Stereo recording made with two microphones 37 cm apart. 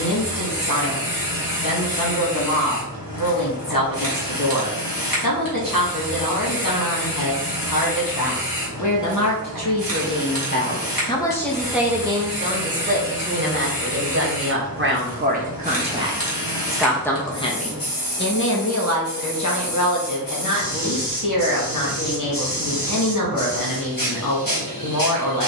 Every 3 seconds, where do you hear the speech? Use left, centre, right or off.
left, left, left, left, right, centre, left, left, left.